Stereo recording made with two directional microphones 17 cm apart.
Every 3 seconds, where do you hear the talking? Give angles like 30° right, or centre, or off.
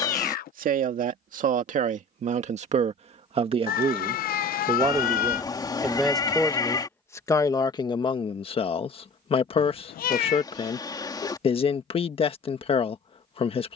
50° right, 20° right, 20° left, 30° left, 30° left.